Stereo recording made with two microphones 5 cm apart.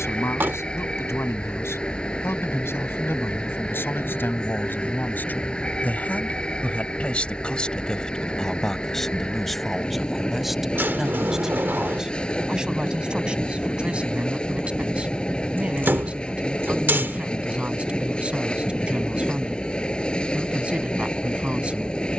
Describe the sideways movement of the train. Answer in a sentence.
In this clip you hear the train stay put.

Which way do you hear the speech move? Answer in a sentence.
In this clip you hear the speech go from the left side to the right.